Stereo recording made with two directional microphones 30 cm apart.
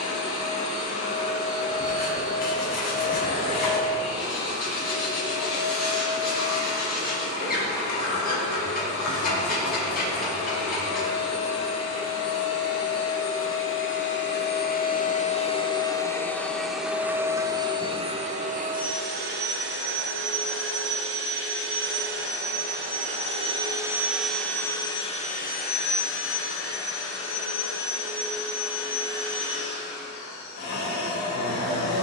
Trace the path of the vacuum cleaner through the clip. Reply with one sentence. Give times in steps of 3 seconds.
You can hear the vacuum cleaner on the left from 0 s, in the centre from 15 s, on the right from 18 s and on the left from 24 s.